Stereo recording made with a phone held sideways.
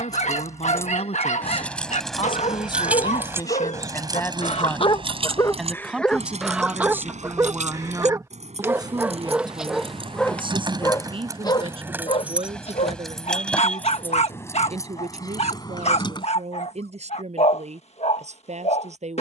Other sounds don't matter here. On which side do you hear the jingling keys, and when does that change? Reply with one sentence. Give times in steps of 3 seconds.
You can hear the jingling keys in the centre from 0 s, on the right from 3 s, in the centre from 12 s, on the left from 15 s and not at all from 18 s.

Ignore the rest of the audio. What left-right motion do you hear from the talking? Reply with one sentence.
In this clip you hear the talking go from the left side to the right.